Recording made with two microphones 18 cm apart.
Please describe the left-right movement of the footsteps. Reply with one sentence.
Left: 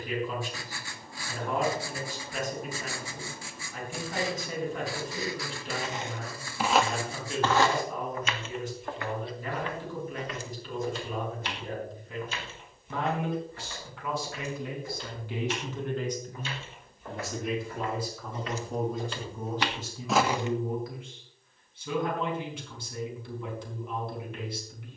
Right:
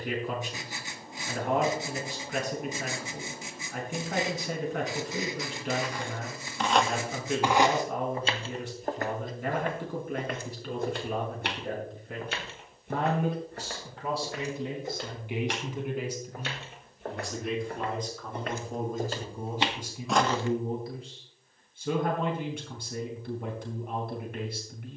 You can hear the footsteps go right and come back.